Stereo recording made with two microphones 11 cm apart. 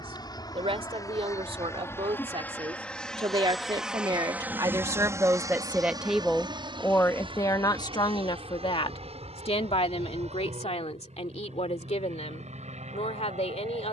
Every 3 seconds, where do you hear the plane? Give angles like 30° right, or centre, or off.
30° left, 20° right, 50° right, 60° right, 70° right.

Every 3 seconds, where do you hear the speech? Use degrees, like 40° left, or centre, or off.
60° right, 30° right, 30° left, 70° left, 80° left.